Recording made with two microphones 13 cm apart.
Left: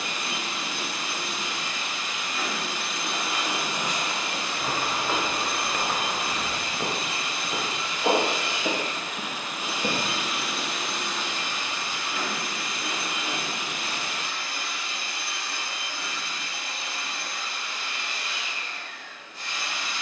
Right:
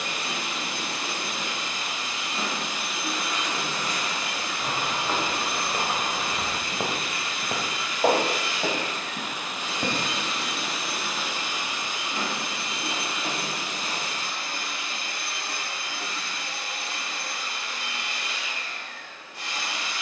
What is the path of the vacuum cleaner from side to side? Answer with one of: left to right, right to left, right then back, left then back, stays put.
left then back.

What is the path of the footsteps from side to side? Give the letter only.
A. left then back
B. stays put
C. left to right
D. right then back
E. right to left
C.